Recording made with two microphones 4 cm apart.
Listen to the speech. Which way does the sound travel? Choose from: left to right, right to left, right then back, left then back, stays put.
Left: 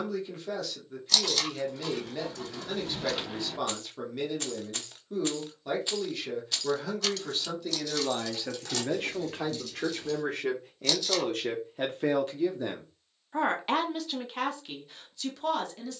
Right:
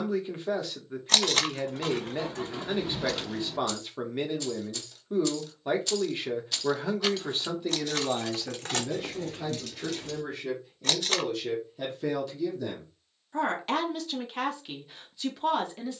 left then back.